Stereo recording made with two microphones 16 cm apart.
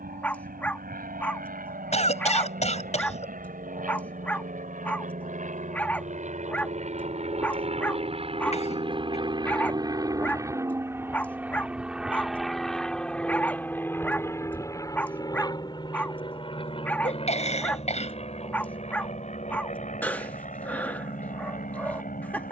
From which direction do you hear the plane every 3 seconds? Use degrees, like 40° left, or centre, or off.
70° right, 60° right, 40° right, 20° right, 10° left, 30° left, 40° left, 50° left.